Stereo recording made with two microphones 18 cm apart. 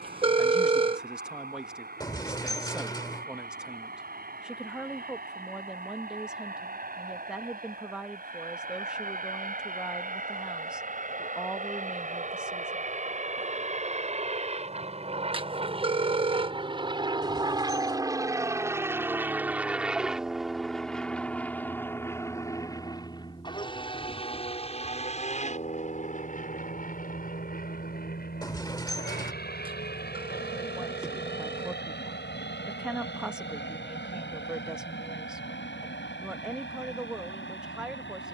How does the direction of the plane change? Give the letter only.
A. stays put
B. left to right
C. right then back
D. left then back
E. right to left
E.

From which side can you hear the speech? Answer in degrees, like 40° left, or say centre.
10° right.